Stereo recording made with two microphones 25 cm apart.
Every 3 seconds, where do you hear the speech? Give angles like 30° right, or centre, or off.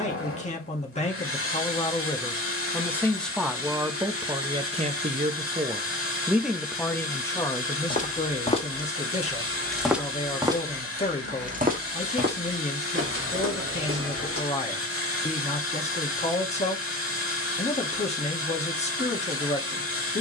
20° left, 20° right, 10° left, 30° left, 30° left, 30° left, 30° left.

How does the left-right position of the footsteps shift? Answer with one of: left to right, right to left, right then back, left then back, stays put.
left to right.